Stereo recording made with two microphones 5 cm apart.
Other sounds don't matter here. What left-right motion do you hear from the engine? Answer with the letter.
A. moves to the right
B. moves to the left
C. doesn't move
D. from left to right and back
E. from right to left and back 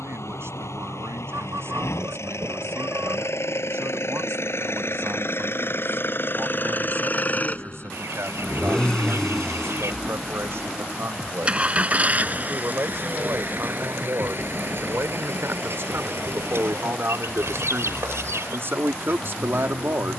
A.